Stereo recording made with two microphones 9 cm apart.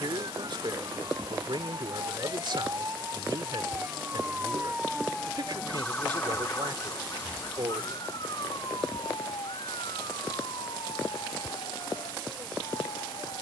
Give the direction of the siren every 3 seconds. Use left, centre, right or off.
right, centre, left, left, left.